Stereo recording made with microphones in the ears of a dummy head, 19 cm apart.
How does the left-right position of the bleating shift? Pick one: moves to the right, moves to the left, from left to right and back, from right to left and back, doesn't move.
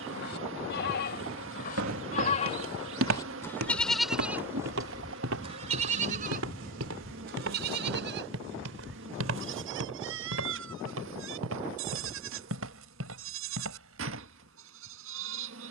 moves to the right.